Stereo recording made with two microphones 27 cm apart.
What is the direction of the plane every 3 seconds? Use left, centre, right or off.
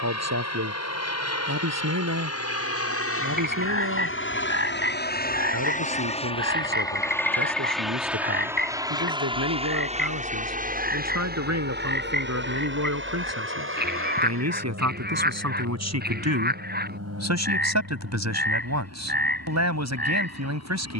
left, left, centre, right, right, right, right.